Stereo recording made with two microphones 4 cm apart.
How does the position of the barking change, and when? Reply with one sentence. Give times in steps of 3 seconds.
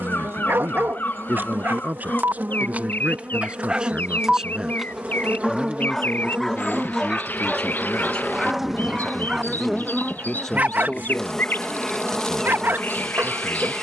In this clip you hear the barking on the right from 0 s, in the centre from 3 s and on the right from 9 s.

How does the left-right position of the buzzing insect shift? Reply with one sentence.
In this clip you hear the buzzing insect move to the left.